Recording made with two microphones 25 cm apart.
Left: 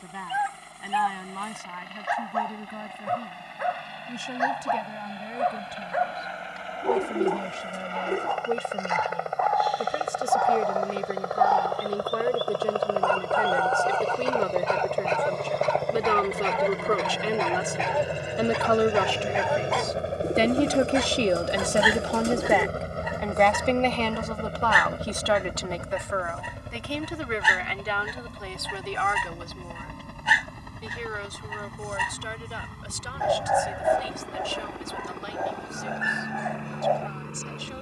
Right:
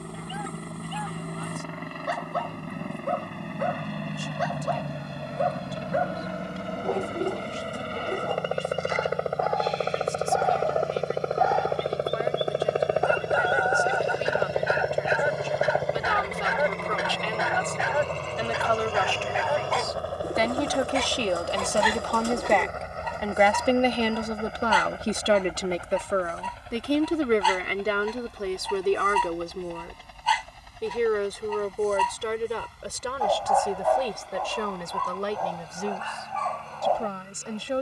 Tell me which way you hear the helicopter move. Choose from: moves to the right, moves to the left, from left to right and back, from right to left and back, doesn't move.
moves to the left.